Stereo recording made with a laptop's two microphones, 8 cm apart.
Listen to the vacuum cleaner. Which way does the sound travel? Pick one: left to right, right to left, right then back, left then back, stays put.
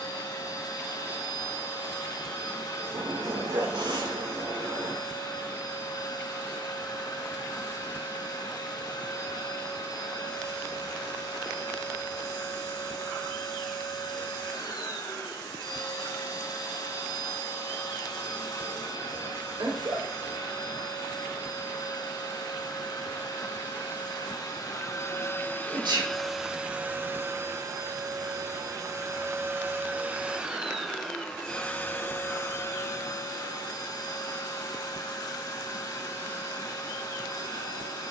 right then back.